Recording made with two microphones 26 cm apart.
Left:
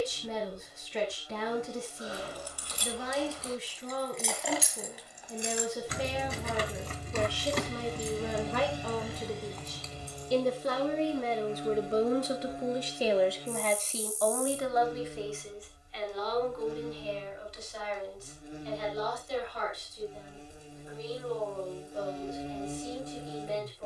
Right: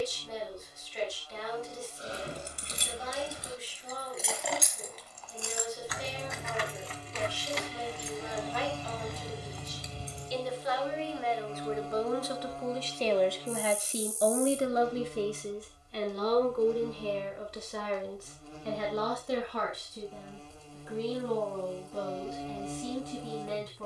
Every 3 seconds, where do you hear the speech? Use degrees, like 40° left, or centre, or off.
70° left, 70° left, 70° left, 50° left, centre, 50° right, 70° right, 80° right.